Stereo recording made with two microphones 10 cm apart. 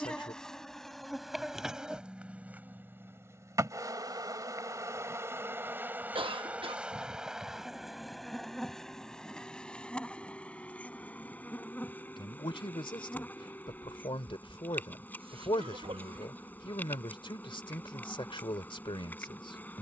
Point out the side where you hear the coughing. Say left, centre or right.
right.